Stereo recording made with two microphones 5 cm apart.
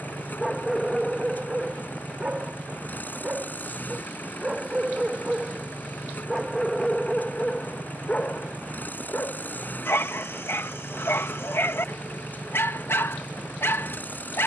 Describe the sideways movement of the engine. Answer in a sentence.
You can hear the engine stay put.